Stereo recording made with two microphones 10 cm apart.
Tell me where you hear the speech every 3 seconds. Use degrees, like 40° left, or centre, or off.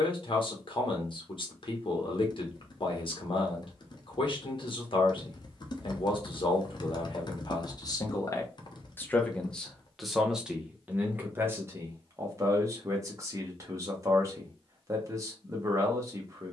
60° left, 60° left, 50° left, 10° right, 30° right, 30° right.